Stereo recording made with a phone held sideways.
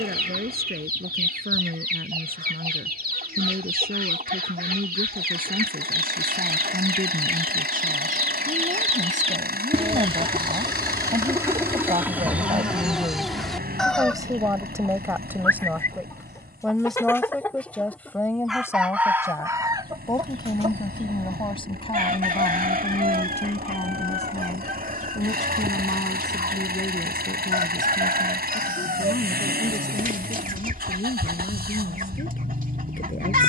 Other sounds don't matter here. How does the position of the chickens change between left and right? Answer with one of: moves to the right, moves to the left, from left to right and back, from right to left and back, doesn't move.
from right to left and back.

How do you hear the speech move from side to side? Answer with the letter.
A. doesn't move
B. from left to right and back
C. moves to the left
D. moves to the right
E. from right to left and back
C.